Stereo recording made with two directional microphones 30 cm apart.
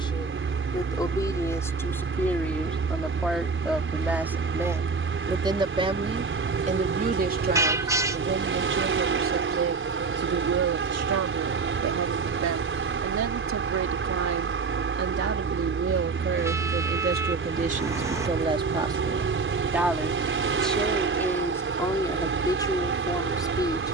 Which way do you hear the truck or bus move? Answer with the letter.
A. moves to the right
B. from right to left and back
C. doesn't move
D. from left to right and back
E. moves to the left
C.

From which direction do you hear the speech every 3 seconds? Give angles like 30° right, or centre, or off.
10° left, 10° right, 30° right, 50° right, 60° right, 40° right, 10° right, 10° left.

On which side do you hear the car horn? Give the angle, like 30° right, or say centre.
10° right.